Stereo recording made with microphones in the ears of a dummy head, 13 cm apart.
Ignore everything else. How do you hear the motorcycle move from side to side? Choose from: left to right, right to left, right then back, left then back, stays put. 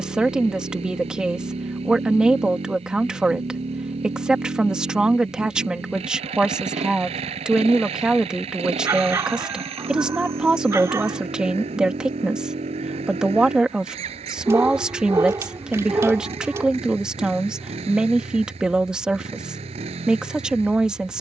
stays put.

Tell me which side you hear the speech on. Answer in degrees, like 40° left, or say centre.
10° right.